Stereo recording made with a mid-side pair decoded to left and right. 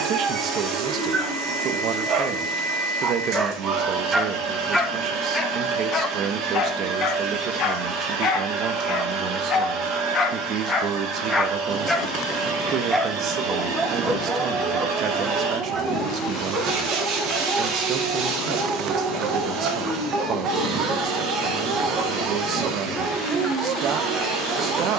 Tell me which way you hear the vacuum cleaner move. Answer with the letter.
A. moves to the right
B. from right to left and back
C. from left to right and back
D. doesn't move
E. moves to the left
D.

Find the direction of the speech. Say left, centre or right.
right.